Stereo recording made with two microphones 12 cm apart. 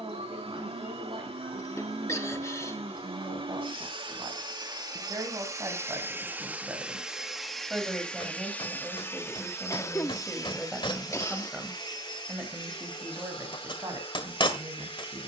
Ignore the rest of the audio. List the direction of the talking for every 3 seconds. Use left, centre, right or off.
right, right, centre, centre, right.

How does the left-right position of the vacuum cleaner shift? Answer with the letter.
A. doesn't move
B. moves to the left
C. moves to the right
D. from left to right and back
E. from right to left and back
B.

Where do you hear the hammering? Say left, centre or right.
left.